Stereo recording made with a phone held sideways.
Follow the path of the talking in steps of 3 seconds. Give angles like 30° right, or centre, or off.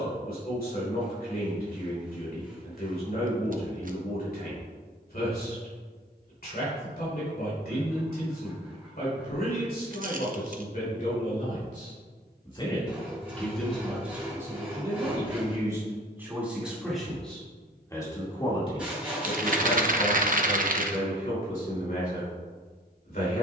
60° left, 60° left, 60° left, 60° left, centre, 10° right, 40° left, 60° left.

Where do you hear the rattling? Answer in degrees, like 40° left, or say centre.
50° right.